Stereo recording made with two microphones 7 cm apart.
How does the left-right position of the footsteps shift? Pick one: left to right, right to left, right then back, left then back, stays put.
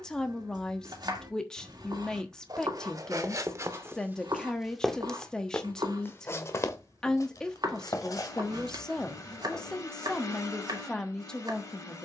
right to left.